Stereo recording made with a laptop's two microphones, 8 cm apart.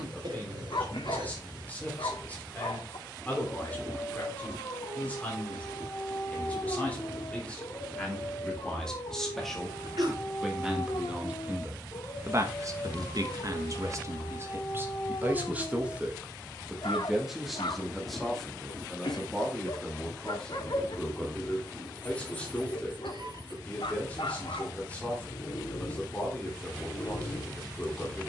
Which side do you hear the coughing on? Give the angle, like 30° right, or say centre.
60° right.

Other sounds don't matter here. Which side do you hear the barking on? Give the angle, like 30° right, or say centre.
80° left.